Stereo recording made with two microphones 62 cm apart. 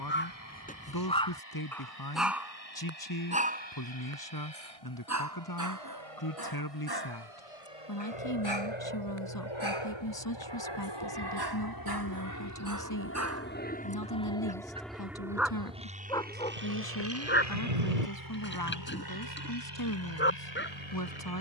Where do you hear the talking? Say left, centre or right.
left.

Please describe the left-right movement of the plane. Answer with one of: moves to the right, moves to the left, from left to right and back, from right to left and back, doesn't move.
moves to the right.